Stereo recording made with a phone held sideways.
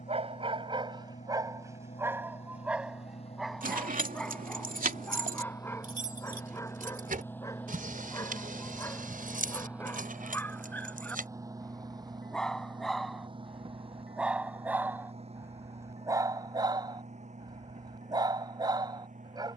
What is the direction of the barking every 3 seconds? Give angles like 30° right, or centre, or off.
20° right, 10° left, 20° left, 10° left, centre, 20° right, 30° right.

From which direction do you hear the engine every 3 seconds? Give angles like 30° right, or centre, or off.
50° left, 40° left, 10° left, 10° right, 40° right, 50° right, 60° right.